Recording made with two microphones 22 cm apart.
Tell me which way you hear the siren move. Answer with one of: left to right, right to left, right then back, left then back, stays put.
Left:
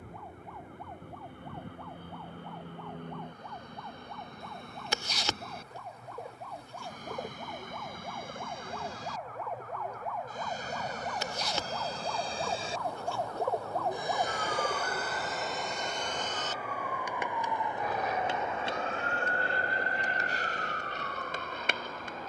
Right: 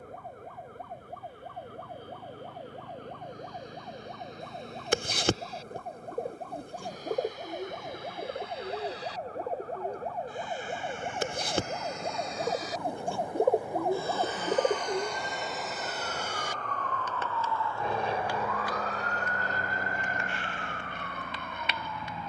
right to left.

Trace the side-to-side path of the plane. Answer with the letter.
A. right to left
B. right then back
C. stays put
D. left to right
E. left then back
D.